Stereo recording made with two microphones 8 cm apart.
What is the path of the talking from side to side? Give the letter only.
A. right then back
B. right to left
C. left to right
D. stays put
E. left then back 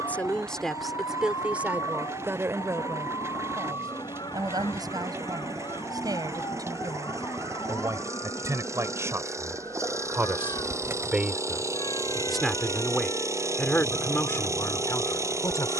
A.